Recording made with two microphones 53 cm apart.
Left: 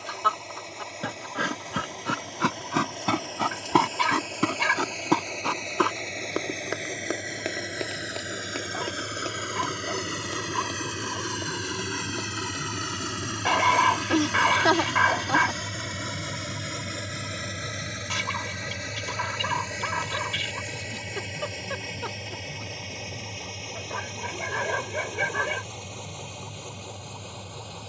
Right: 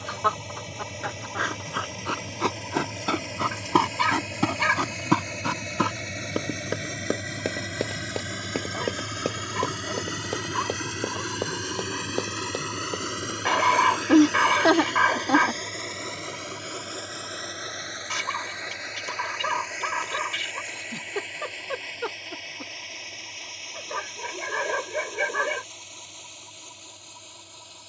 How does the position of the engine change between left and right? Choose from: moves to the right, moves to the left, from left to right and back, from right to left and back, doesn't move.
moves to the left.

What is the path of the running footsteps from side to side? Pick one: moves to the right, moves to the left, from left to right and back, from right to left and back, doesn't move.
moves to the right.